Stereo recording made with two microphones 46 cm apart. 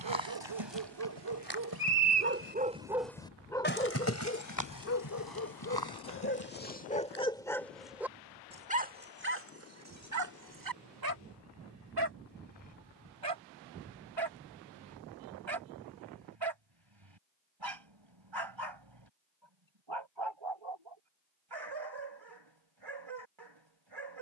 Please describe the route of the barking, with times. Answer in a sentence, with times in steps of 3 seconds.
In this clip you hear the barking on the right from 0 s, on the left from 3 s, in the centre from 6 s and on the right from 9 s.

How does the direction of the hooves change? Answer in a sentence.
You can hear the hooves travel towards the left.